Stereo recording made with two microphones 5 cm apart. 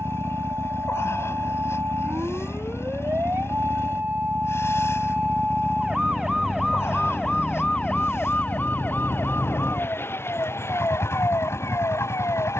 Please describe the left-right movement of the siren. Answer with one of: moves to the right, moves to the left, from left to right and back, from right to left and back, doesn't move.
moves to the left.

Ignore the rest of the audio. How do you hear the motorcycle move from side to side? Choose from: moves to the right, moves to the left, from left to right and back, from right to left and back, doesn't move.
doesn't move.